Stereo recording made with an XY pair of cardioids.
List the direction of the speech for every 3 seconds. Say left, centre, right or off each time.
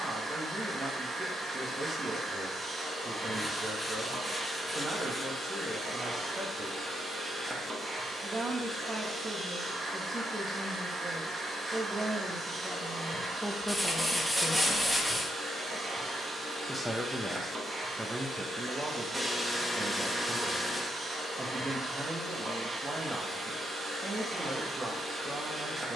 right, right, right, right, centre, centre, right, right, right.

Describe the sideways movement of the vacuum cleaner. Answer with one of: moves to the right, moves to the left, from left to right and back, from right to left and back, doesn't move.
doesn't move.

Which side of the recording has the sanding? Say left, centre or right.
centre.